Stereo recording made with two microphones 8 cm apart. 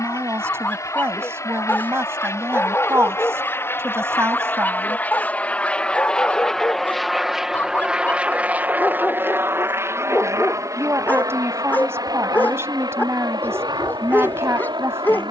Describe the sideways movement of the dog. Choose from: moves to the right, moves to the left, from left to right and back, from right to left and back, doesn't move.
doesn't move.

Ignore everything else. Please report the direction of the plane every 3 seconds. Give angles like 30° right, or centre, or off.
50° left, 30° left, 10° right, 40° right, 60° right.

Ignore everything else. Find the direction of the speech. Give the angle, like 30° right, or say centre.
40° right.